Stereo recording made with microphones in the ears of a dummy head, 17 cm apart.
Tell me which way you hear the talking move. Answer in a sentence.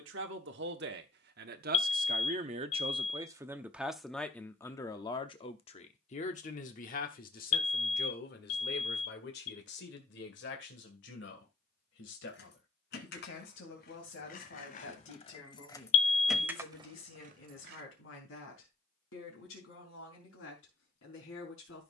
In this clip you hear the talking move from right to left.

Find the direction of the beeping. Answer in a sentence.
In this clip you hear the beeping on the left.